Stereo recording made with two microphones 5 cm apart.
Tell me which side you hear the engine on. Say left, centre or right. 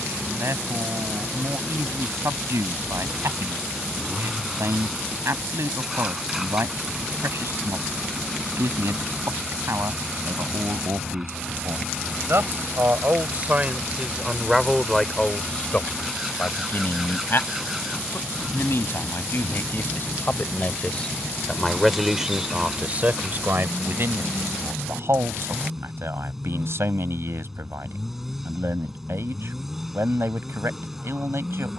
centre.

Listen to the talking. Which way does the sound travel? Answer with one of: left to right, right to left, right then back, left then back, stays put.
left then back.